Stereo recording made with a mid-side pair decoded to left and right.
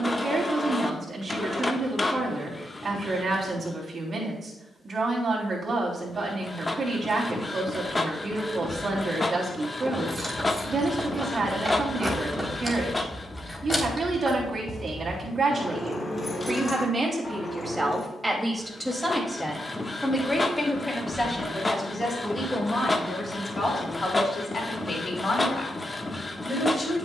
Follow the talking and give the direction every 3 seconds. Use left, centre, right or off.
right, right, right, right, right, right, centre, left, left.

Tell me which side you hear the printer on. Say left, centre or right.
left.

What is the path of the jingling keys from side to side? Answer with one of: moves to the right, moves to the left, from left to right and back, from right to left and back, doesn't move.
moves to the left.